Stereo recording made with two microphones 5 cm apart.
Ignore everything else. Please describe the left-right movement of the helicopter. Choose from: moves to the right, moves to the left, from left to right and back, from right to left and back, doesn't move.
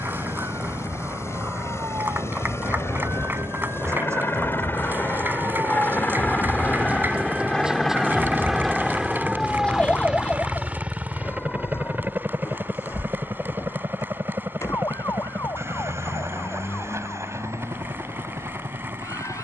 moves to the right.